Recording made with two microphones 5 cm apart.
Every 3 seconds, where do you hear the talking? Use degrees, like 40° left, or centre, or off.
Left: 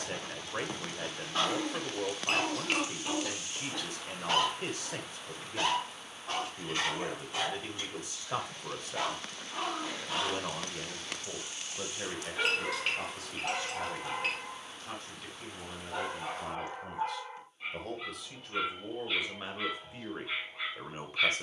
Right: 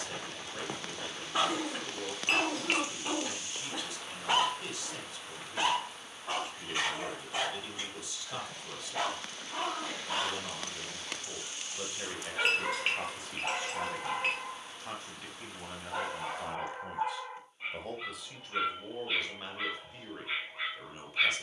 40° left, 40° left, 40° left, 30° left, 20° right, 20° right, 10° left.